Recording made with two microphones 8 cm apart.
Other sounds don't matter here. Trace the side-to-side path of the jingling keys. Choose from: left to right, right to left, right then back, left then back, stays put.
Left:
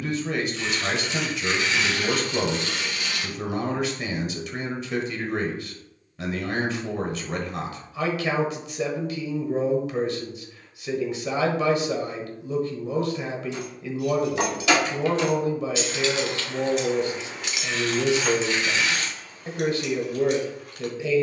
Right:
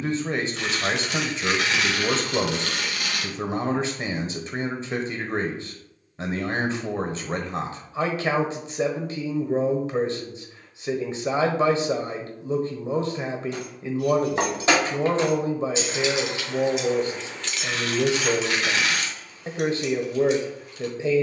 right to left.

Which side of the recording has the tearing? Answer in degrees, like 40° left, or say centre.
60° right.